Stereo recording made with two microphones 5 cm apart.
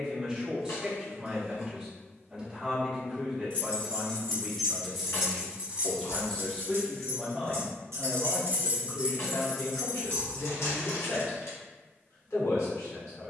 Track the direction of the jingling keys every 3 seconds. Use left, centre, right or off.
off, centre, right, centre, off.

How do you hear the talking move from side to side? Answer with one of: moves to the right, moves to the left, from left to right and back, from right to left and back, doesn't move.
moves to the left.